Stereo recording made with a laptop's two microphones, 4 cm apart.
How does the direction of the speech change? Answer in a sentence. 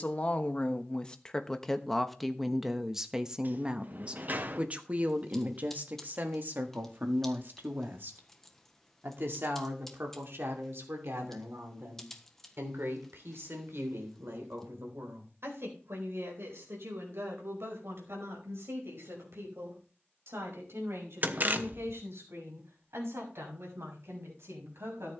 In this clip you hear the speech move to the right.